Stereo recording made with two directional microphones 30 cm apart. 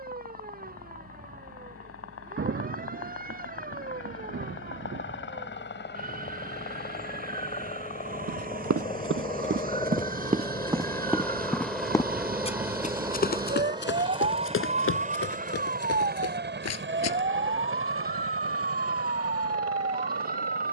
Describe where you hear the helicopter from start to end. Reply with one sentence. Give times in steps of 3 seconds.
In this clip you hear the helicopter on the left from 0 s, in the centre from 9 s and on the right from 15 s.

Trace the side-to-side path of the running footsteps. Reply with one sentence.
You can hear the running footsteps move from right to left.